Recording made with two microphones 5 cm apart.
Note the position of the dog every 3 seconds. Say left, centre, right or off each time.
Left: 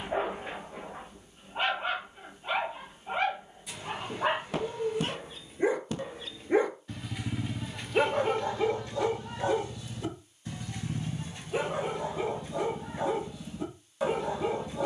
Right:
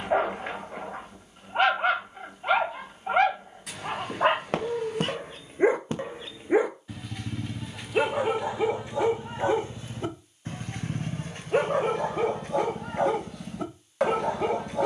right, right, centre, right, right.